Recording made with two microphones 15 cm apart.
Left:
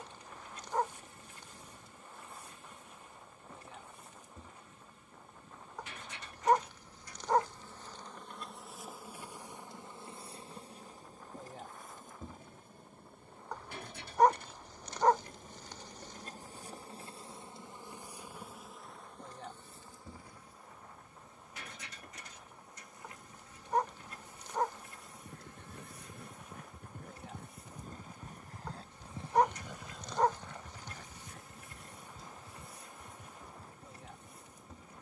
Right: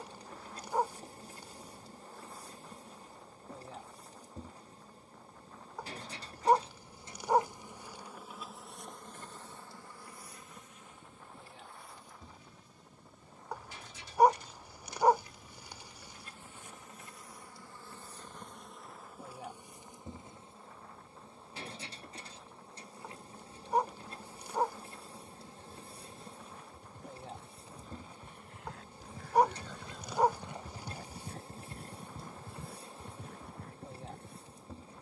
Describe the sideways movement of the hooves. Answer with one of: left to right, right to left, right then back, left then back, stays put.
left to right.